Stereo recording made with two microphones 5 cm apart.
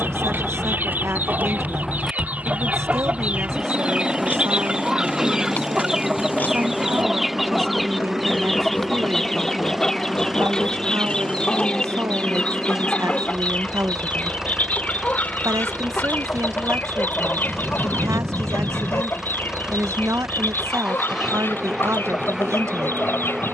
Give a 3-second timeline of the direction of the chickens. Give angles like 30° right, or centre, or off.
40° right, 20° right, centre, 10° left, 30° left, 40° left, 40° left, 50° left.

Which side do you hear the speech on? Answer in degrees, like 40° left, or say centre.
70° right.